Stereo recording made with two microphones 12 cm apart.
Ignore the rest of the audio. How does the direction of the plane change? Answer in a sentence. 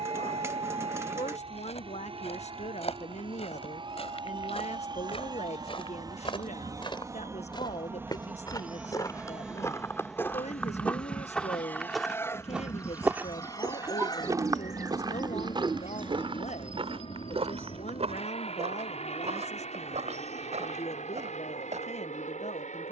In this clip you hear the plane go from the right side to the left.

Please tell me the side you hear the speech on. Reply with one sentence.
In this clip you hear the speech on the left.